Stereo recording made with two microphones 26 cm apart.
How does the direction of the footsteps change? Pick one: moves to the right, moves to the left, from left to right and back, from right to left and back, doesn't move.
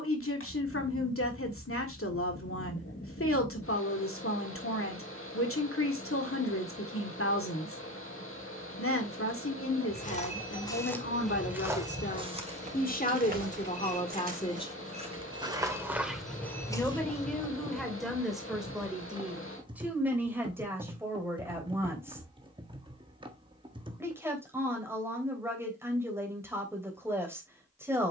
from left to right and back.